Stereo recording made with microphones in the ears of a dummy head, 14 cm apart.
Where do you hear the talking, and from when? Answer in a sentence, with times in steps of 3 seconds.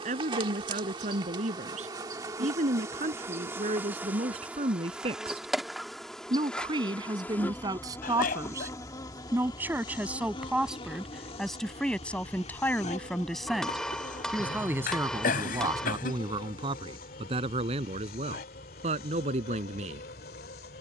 In this clip you hear the talking on the right from 0 s, in the centre from 9 s and on the right from 15 s.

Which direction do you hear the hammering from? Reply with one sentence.
In this clip you hear the hammering in the centre.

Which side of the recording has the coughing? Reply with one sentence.
You can hear the coughing on the left.